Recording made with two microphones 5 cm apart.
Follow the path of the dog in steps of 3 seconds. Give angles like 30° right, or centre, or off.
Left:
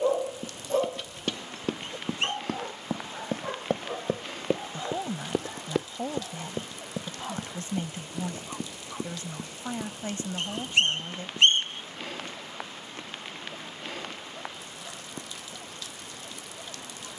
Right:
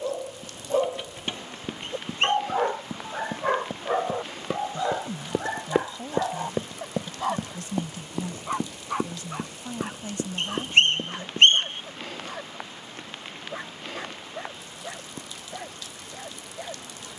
20° right, 60° right, 70° right, 70° right, 70° right, 70° right.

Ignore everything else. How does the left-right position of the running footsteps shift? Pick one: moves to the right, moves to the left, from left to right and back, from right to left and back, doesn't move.
moves to the right.